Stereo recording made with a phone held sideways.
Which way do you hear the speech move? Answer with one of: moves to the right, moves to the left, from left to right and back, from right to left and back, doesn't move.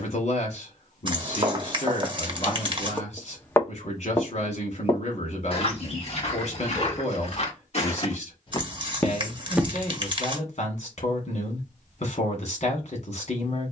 doesn't move.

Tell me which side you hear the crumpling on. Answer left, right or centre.
right.